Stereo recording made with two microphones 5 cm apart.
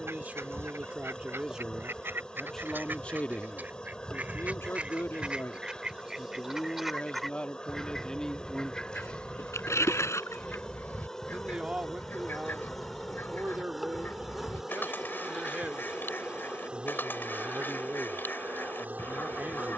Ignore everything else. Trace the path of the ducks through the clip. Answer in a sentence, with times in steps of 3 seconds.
In this clip you hear the ducks on the right from 0 s, in the centre from 6 s and on the left from 9 s.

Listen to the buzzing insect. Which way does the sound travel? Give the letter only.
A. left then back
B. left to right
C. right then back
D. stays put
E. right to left
B.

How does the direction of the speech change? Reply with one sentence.
In this clip you hear the speech go left and come back.